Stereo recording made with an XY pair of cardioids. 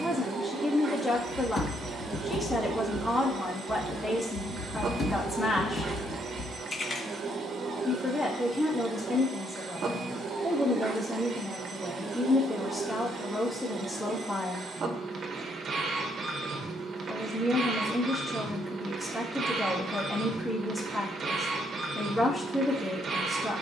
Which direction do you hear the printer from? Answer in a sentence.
You can hear the printer on the right.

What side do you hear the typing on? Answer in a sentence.
You can hear the typing on the left.